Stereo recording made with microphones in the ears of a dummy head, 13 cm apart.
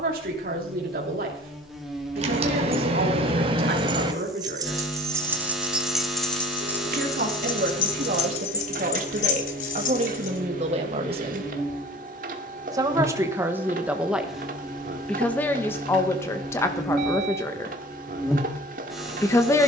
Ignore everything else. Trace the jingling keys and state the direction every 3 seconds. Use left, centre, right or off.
right, right, left, left, off, off, off.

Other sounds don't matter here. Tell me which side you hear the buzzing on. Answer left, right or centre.
centre.